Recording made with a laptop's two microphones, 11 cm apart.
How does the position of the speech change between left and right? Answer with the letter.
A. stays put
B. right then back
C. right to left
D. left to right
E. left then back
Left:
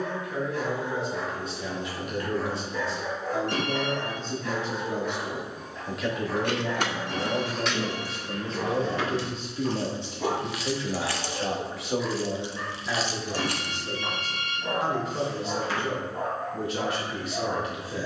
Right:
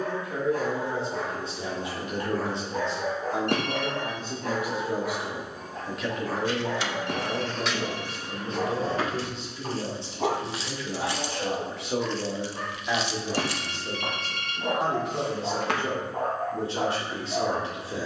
E.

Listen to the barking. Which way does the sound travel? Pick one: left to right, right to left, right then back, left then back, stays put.
stays put.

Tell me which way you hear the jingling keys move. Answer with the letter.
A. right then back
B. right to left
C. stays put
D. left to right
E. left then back
A.